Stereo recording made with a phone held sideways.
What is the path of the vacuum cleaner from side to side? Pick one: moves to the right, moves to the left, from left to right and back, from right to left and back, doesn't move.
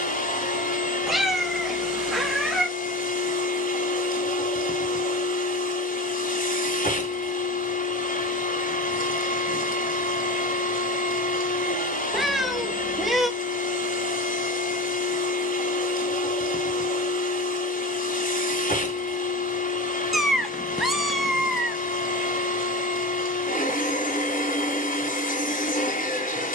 doesn't move.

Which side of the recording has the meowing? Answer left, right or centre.
centre.